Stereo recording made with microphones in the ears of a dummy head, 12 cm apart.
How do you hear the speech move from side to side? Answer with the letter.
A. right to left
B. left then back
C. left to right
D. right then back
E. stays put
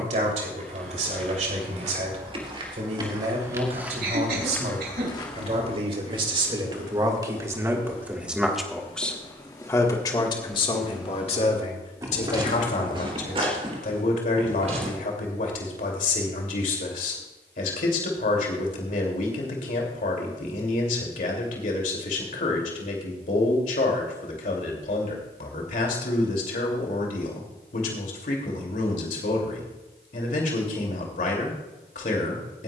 A.